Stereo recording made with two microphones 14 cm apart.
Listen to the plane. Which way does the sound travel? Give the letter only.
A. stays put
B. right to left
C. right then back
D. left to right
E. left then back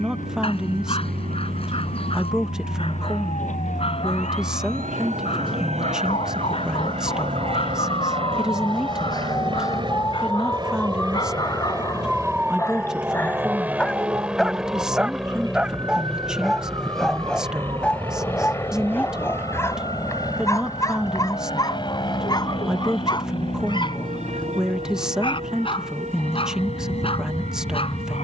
B.